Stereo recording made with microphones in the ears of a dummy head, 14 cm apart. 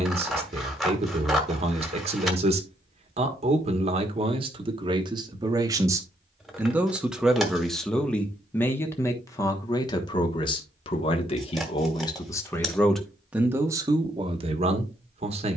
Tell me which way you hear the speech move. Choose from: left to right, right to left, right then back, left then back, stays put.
left then back.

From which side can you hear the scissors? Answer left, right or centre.
centre.